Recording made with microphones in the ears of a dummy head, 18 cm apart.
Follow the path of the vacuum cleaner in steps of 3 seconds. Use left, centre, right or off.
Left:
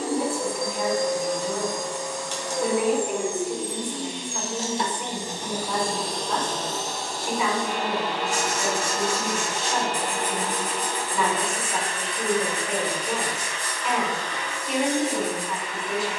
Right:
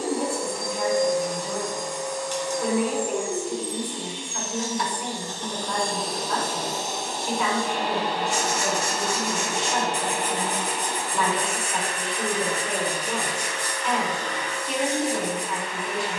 left, left, right, right, right, right.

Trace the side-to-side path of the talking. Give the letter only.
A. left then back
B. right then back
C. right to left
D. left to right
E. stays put
E.